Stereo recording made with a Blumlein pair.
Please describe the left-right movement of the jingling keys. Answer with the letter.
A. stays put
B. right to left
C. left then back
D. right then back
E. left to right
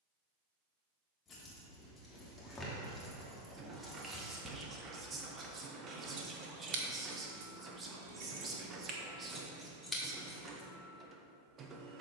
D.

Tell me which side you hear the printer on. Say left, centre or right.
right.